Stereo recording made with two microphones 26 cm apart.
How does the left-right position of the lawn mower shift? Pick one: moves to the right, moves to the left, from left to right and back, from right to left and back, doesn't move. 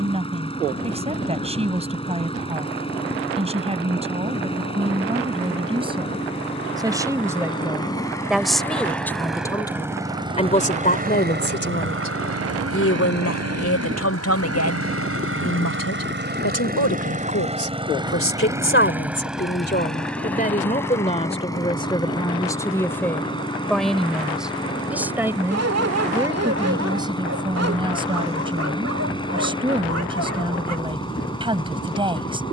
from left to right and back.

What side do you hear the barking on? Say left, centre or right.
right.